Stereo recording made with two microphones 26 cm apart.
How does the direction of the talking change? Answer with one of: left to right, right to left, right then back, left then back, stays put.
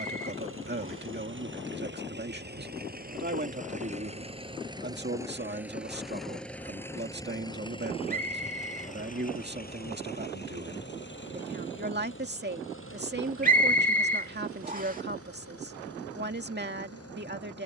stays put.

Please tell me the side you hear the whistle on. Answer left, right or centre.
right.